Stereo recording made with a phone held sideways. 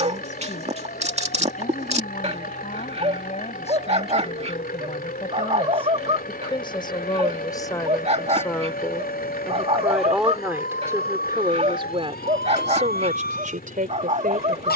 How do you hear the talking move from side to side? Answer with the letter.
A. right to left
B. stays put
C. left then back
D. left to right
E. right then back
D.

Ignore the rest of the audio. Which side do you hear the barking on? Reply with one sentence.
In this clip you hear the barking on the right.